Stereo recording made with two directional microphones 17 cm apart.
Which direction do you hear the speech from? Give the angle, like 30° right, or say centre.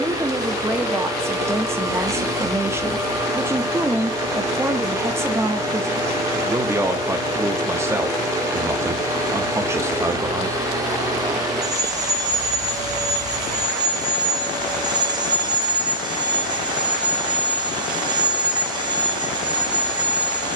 20° right.